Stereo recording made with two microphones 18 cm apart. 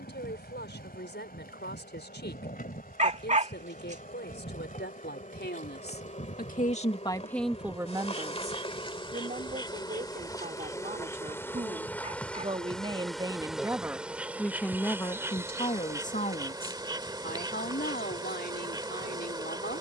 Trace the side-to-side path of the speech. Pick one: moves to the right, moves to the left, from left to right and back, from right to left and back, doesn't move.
from left to right and back.